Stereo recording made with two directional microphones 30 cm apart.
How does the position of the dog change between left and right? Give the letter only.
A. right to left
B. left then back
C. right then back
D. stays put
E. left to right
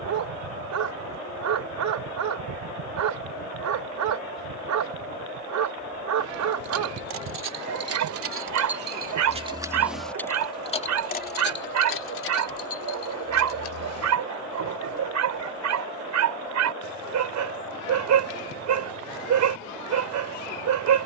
D.